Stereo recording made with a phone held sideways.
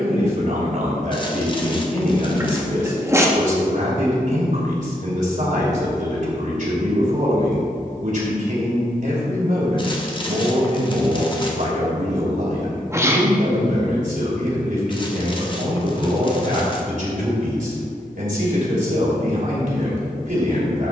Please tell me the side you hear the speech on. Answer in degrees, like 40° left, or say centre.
70° right.